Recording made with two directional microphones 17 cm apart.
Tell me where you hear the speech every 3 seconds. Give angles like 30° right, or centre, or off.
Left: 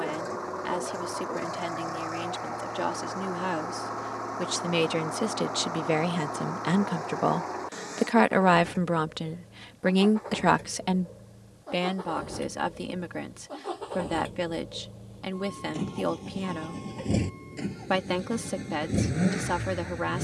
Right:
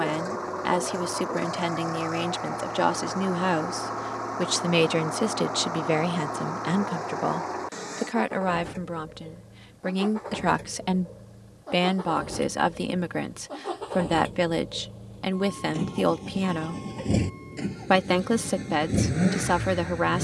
40° right, 30° right, 10° left, 10° left, 40° right, 40° right, 40° right.